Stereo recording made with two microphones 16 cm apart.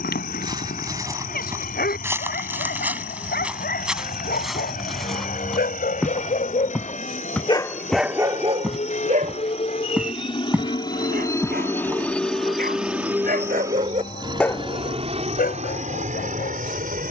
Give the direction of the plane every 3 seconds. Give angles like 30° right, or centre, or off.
70° left, 70° left, 60° left, 30° left, 10° right, 50° right.